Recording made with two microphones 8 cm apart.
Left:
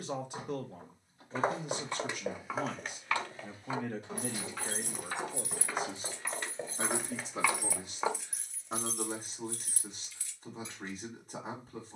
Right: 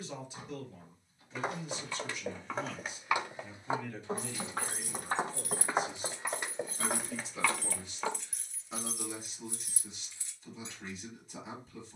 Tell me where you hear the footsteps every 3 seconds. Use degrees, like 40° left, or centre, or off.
20° left, 40° right, 10° right, off.